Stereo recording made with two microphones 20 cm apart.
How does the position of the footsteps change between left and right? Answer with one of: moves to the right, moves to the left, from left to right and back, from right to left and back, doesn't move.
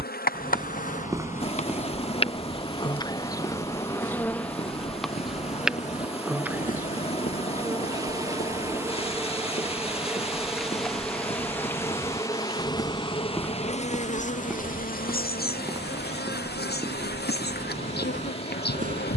from right to left and back.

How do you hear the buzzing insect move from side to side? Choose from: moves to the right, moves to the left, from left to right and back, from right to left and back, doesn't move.
from left to right and back.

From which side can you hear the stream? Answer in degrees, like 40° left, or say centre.
30° left.